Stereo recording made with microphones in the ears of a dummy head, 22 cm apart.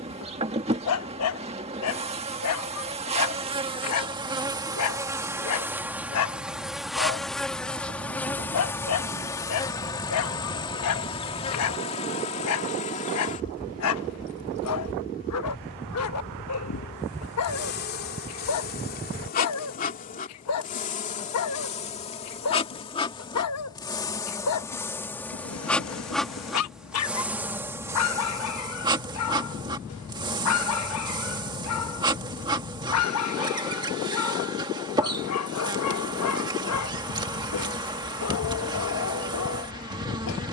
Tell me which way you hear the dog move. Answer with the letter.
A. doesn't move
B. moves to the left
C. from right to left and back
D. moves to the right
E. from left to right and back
A.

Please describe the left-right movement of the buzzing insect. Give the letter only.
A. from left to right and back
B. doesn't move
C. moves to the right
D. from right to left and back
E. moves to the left
D.